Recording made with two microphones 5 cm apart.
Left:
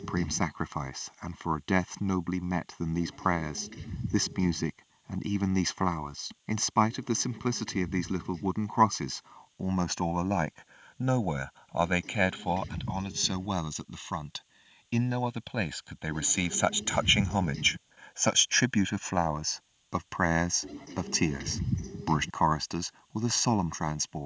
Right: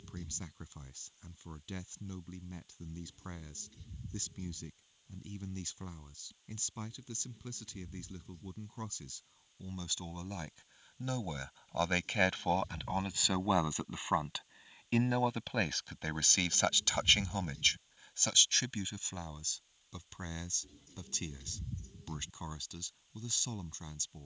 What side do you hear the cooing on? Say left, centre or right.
left.